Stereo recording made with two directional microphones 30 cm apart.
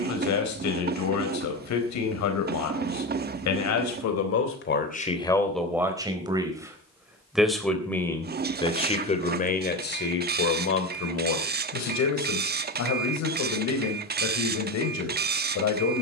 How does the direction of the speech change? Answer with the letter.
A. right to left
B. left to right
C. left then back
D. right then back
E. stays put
D.